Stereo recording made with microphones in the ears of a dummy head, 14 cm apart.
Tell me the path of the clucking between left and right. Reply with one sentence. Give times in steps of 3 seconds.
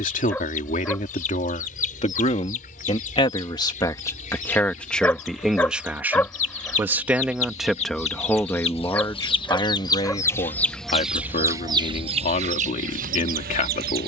In this clip you hear the clucking on the left from 0 s, in the centre from 9 s and on the right from 12 s.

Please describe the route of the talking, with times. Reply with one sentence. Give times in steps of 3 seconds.
You can hear the talking on the left from 0 s, in the centre from 3 s and on the left from 9 s.